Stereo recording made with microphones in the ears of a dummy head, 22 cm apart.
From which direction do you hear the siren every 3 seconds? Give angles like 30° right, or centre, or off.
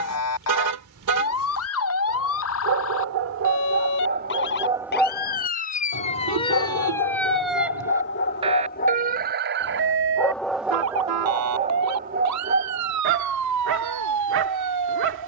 60° left, 40° left, centre, 50° right, 70° right.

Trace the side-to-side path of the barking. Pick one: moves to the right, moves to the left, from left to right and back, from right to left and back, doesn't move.
from right to left and back.